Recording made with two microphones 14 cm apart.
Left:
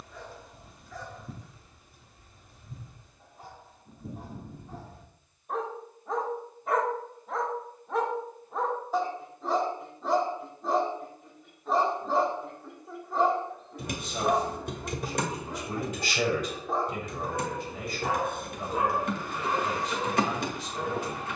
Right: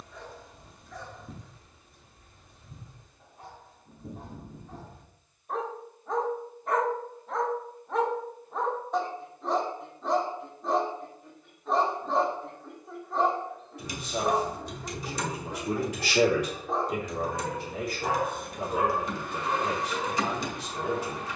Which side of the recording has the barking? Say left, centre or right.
centre.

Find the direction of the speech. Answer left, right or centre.
right.